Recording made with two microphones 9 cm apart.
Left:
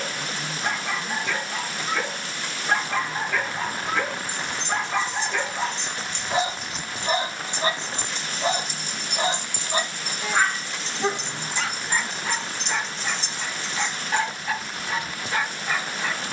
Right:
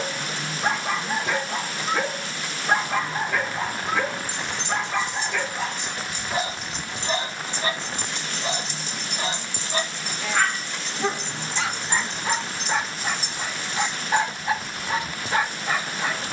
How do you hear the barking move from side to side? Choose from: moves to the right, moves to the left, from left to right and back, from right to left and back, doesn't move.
from right to left and back.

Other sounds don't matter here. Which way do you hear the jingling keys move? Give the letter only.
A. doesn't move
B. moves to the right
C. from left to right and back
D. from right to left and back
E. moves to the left
D.